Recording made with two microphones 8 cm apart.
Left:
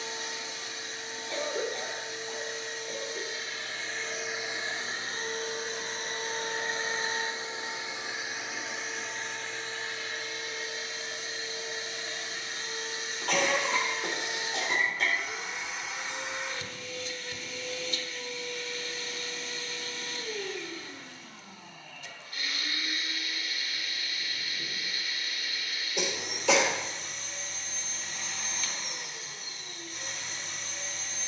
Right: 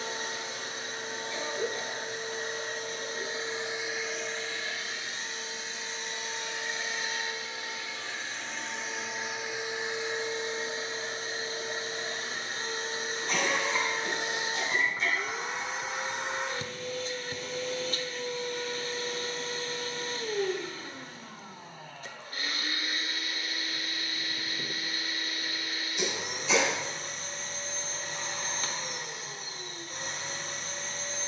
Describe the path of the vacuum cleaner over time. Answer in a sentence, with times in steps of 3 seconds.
You can hear the vacuum cleaner on the right from 0 s, in the centre from 3 s, on the left from 6 s and on the right from 9 s.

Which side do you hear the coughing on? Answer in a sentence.
You can hear the coughing on the left.